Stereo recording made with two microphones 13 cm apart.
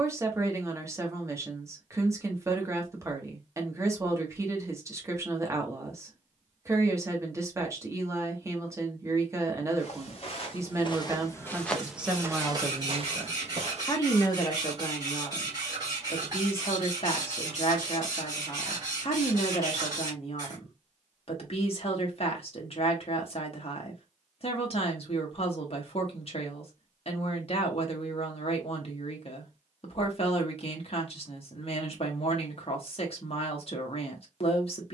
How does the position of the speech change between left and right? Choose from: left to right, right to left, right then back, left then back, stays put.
right to left.